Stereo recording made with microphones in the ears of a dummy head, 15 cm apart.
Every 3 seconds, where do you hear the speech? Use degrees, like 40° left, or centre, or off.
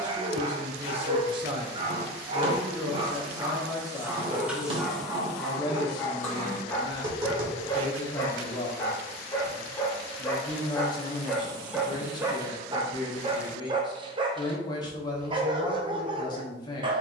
30° right, 20° left, 30° left, 30° left, 30° left, 30° left.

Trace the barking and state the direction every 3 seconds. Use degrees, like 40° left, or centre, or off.
30° right, 10° right, 20° left, 10° left, 30° right, 30° right.